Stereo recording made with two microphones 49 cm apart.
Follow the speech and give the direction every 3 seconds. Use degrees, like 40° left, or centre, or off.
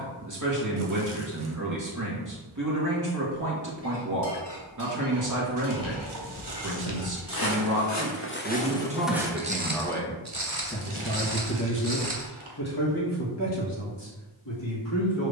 40° right, 40° right, 30° right, 20° left, 60° left.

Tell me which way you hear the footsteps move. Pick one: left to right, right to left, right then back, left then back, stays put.
left to right.